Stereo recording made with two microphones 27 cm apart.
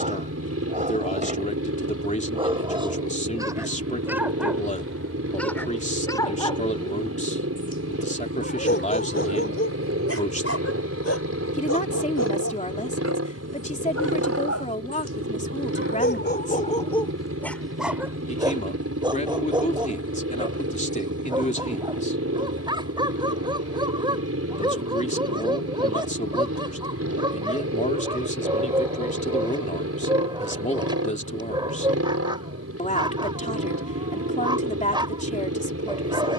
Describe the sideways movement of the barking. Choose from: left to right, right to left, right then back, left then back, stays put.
left then back.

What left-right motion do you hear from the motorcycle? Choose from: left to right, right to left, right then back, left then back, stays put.
stays put.